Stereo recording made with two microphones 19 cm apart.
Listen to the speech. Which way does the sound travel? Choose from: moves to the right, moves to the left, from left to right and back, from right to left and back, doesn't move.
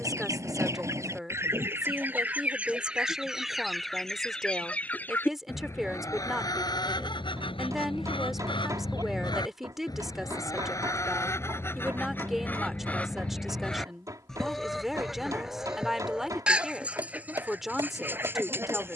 doesn't move.